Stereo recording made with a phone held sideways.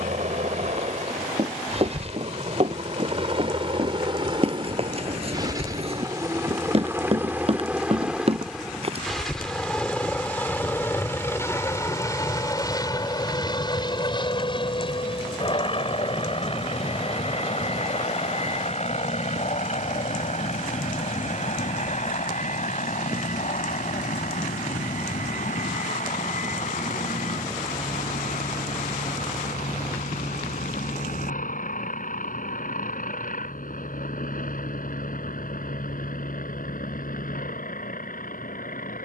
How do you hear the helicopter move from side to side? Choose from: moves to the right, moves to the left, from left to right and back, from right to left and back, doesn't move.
moves to the left.